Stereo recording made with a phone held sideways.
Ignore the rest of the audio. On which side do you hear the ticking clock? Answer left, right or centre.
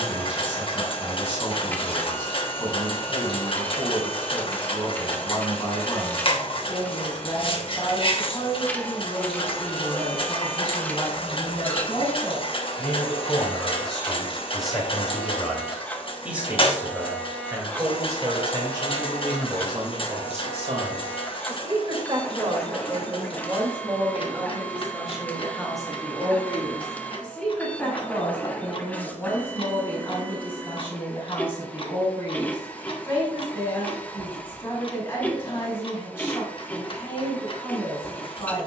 left.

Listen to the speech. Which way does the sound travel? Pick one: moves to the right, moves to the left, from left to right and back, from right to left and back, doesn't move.
from left to right and back.